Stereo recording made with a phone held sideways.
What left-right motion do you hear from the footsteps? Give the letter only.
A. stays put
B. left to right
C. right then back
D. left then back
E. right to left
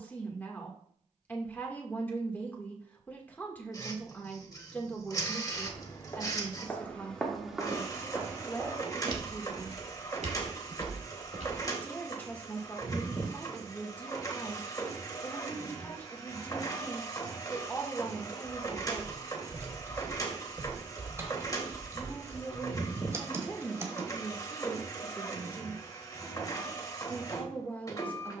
B.